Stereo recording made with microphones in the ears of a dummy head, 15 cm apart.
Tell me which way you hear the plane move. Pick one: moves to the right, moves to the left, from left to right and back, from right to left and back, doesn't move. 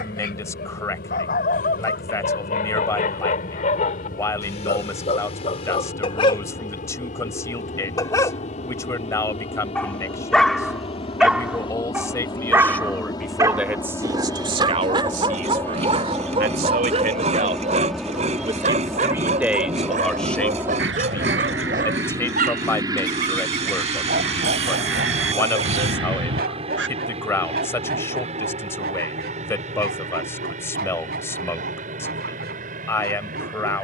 moves to the right.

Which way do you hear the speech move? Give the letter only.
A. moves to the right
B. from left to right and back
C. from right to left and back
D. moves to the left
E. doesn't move
B.